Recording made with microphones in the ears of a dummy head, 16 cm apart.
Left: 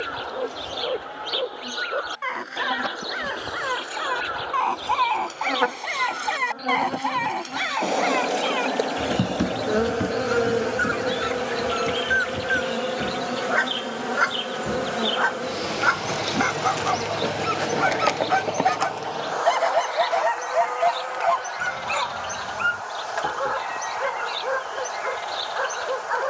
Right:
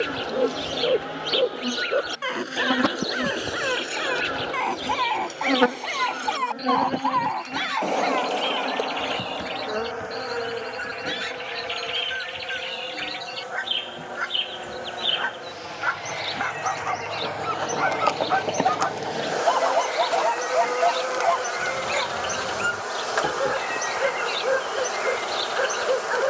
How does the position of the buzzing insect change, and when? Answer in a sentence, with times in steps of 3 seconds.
You can hear the buzzing insect on the right from 0 s, in the centre from 6 s, on the left from 9 s and on the right from 18 s.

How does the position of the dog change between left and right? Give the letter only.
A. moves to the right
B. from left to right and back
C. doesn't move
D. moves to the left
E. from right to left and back
E.